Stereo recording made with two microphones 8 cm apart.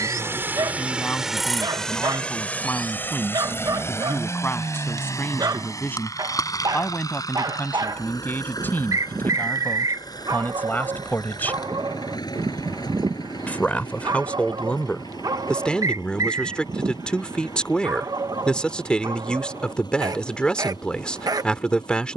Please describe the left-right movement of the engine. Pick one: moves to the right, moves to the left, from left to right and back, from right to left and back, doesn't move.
moves to the left.